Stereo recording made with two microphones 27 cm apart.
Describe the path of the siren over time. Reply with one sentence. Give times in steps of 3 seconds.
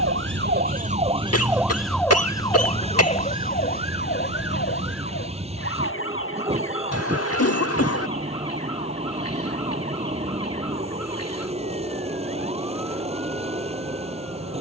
In this clip you hear the siren in the centre from 0 s and on the left from 3 s.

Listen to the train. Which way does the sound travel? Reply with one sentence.
You can hear the train stay put.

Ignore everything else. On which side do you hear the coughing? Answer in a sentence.
In this clip you hear the coughing on the left.